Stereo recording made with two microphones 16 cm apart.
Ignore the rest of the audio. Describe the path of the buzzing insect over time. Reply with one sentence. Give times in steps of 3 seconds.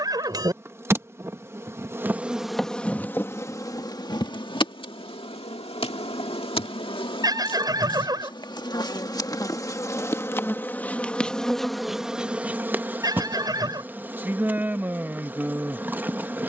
In this clip you hear the buzzing insect in the centre from 0 s, on the left from 3 s and in the centre from 9 s.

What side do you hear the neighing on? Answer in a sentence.
You can hear the neighing on the right.